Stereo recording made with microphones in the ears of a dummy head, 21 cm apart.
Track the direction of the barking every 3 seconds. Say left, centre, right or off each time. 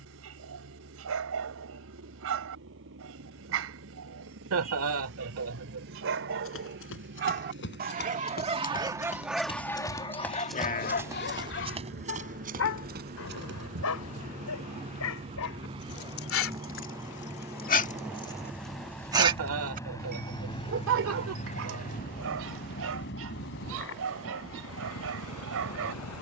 right, right, right, left, left, left, right, right, right.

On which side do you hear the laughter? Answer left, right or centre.
right.